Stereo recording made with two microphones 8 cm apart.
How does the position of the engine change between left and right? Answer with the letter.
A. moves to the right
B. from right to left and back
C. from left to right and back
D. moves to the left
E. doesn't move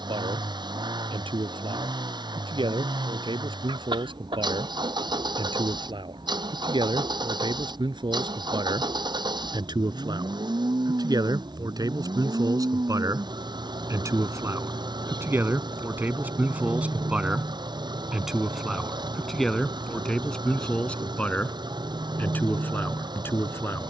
E.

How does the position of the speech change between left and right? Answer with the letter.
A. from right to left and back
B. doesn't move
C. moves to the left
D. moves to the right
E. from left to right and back
C.